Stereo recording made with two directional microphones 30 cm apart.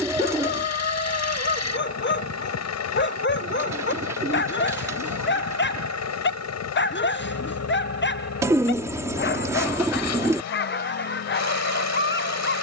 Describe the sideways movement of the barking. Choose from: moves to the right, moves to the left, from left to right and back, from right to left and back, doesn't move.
doesn't move.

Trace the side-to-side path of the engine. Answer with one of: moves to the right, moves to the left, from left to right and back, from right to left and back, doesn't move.
doesn't move.